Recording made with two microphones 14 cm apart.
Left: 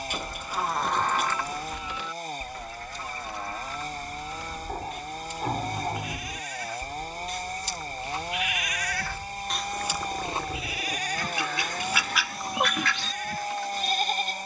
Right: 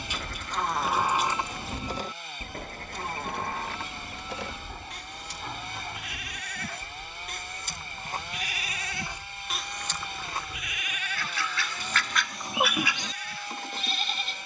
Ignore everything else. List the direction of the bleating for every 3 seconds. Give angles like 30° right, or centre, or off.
20° right, 70° right, 50° right, 20° left, 40° left.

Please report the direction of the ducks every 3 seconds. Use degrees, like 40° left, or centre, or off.
60° right, 10° right, 20° left, 20° left, 30° right.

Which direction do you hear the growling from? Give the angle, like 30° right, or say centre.
50° left.